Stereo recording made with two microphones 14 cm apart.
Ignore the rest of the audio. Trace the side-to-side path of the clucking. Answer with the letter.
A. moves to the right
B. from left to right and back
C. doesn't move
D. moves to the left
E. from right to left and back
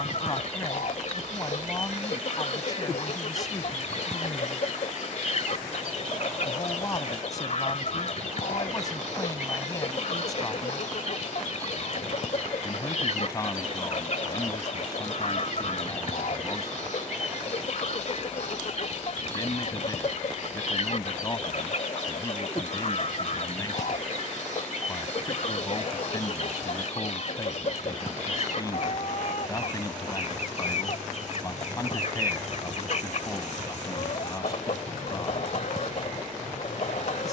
C.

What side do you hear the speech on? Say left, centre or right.
left.